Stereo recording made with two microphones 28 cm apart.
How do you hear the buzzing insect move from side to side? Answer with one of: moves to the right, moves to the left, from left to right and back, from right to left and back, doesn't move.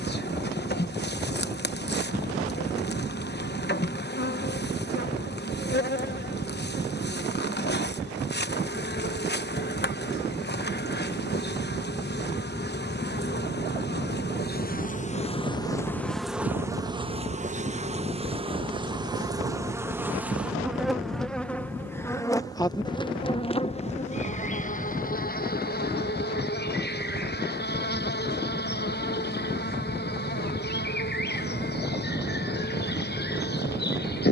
from left to right and back.